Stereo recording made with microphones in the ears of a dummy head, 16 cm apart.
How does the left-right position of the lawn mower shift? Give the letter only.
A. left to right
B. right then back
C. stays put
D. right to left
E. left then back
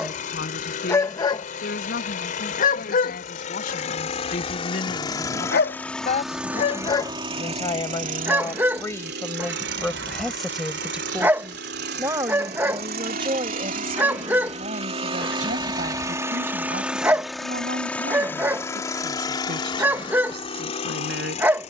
B.